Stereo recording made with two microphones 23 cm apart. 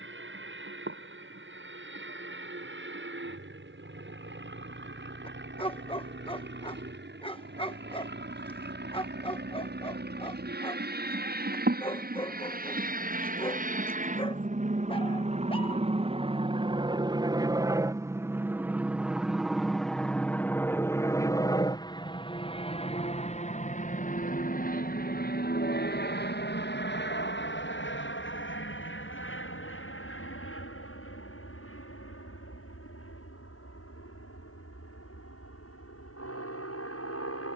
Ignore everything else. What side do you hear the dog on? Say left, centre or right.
left.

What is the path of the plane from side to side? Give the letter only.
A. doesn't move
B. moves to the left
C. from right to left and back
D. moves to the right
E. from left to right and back
B.